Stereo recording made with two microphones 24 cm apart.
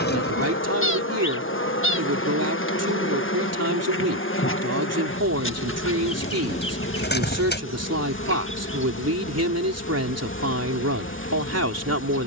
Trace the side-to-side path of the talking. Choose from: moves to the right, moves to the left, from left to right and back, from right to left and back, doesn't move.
doesn't move.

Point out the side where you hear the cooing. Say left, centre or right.
left.